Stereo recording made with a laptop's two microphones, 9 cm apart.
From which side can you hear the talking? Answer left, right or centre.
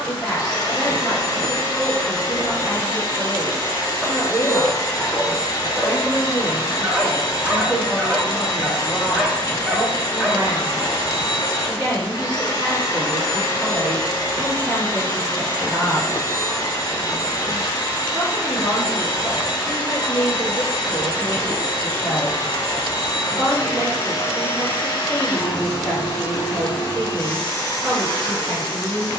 right.